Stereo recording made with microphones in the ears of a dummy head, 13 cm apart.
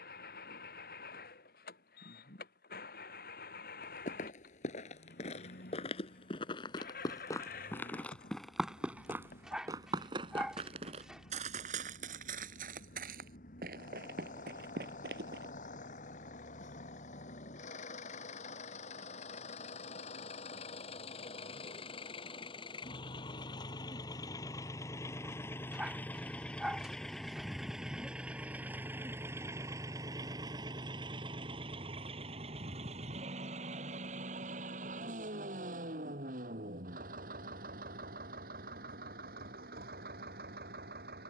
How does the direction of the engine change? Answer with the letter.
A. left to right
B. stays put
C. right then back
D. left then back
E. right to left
A.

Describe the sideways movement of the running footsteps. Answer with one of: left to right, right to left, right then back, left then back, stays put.
left to right.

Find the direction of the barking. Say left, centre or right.
centre.